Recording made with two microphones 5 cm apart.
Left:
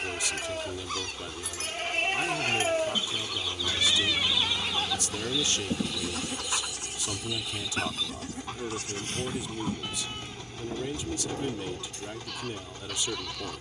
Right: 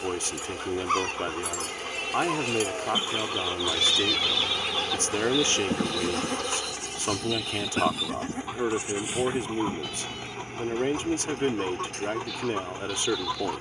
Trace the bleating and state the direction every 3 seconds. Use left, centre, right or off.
left, centre, right, left, left.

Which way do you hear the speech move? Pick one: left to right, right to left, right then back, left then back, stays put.
stays put.